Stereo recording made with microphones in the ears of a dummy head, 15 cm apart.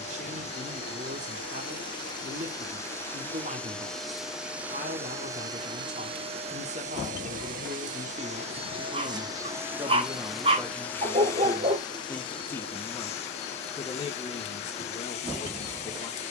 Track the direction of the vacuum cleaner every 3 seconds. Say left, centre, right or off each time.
left, centre, right, centre, left, left.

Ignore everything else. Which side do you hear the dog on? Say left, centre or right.
right.